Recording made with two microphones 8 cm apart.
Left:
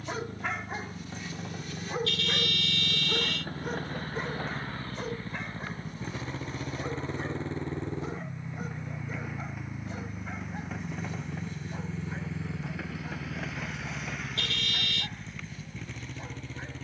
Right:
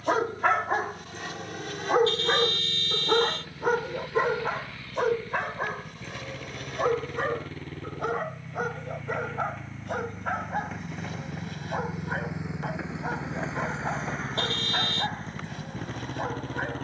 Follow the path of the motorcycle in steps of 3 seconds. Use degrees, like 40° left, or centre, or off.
50° left, 40° left, 30° left, centre, 30° right, 40° right.